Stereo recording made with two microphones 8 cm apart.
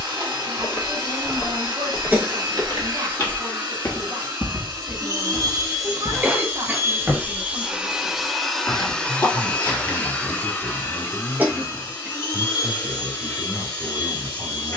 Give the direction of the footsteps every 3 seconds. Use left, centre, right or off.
left, left, centre, left, off.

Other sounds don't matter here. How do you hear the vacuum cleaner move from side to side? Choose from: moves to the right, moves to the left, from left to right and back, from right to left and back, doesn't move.
moves to the left.